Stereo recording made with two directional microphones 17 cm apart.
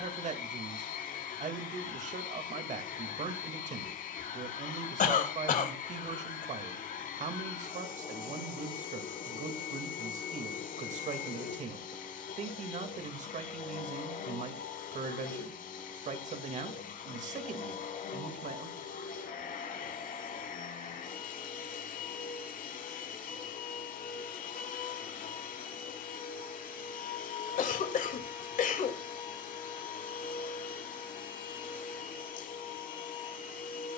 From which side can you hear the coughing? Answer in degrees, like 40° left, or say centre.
50° left.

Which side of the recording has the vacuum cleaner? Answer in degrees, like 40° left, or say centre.
50° left.